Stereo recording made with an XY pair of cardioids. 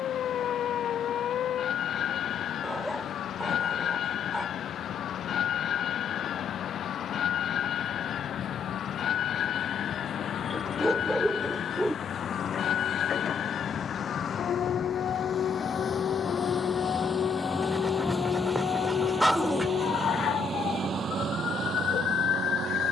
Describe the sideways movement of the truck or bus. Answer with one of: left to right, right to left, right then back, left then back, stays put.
left to right.